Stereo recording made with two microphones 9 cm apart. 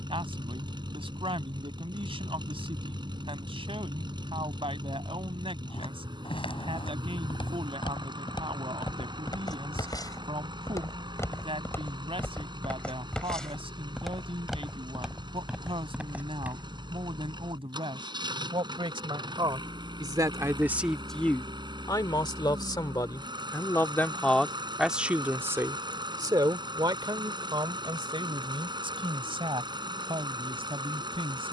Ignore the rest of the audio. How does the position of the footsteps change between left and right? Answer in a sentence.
In this clip you hear the footsteps move from left to right.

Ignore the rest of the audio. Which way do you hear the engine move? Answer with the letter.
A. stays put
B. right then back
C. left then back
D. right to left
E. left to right
A.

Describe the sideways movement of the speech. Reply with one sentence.
You can hear the speech go left and come back.